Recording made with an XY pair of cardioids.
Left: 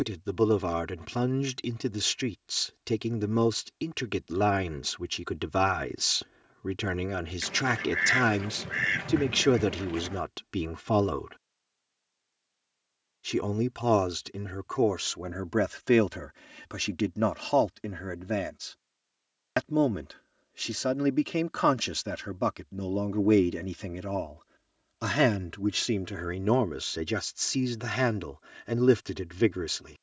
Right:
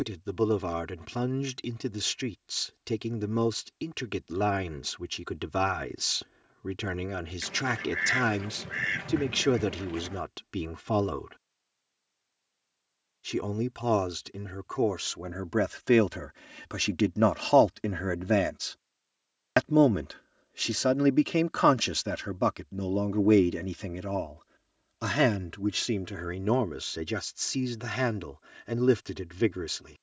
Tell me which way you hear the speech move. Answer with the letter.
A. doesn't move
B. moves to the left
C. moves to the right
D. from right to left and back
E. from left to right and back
E.